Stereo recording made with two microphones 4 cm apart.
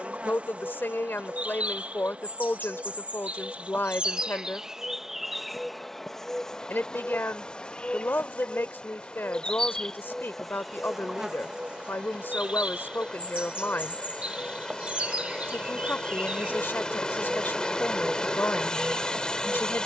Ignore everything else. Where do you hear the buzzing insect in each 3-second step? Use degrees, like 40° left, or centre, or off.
30° right, 20° right, 20° left, centre, 30° right, 30° right, 30° right.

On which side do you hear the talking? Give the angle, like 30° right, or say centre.
50° left.